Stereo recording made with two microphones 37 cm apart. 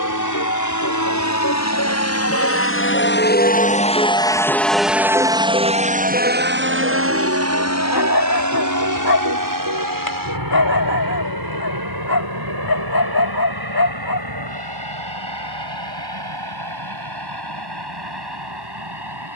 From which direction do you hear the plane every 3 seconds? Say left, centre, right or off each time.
left, centre, right, right, right, right, right.